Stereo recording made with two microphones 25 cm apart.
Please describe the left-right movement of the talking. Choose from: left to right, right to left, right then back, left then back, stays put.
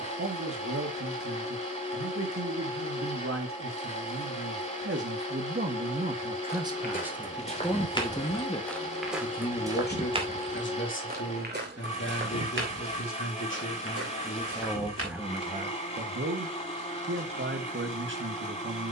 left then back.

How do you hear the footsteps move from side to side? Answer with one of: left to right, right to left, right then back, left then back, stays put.
left to right.